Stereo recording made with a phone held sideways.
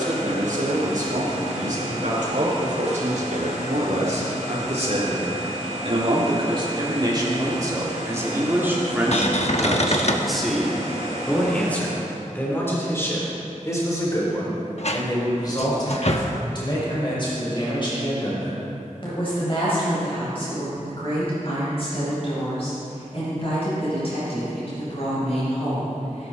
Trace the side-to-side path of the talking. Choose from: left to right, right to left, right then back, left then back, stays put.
right to left.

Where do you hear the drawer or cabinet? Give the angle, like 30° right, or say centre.
50° left.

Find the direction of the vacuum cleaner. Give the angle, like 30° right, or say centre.
50° right.